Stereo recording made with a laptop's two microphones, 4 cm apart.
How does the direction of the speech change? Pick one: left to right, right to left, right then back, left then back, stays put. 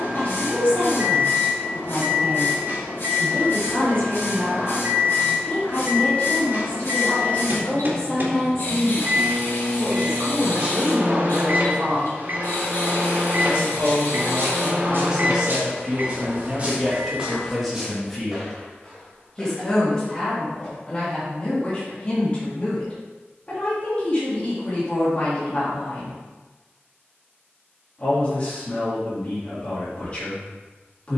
right then back.